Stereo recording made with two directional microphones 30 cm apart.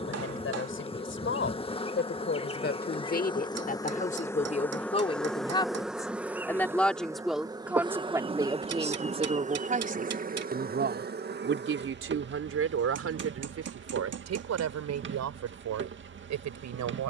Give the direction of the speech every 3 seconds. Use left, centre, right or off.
left, left, centre, right, right, right.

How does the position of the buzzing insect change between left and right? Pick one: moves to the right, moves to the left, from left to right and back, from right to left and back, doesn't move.
moves to the right.